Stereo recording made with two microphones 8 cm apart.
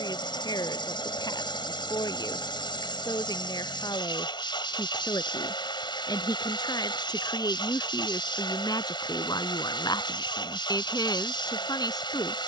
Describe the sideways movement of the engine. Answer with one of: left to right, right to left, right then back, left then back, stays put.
stays put.